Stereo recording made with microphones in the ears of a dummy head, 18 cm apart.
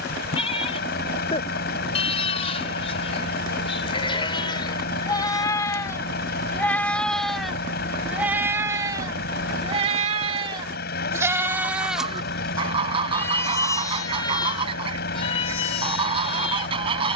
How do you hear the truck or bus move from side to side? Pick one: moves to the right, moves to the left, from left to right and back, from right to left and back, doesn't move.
doesn't move.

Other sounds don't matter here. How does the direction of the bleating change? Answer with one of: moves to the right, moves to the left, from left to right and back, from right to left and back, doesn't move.
from left to right and back.